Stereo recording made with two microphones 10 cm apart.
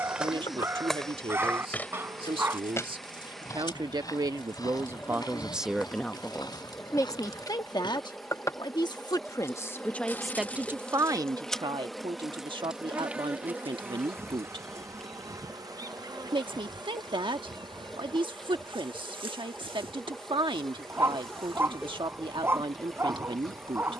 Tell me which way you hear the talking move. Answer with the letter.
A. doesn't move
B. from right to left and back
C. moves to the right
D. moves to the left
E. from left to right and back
B.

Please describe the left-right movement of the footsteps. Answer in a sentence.
In this clip you hear the footsteps travel towards the left.